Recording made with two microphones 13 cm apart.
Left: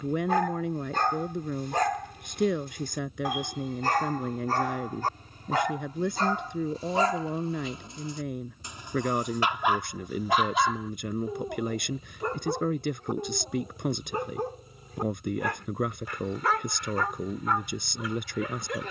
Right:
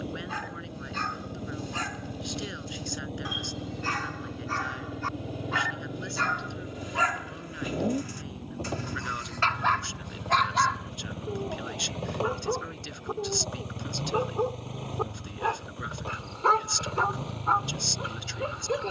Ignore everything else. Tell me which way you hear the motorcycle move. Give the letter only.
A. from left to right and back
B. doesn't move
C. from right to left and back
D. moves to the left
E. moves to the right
B.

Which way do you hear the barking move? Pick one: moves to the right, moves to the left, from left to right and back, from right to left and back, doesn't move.
moves to the right.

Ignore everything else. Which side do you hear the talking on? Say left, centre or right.
left.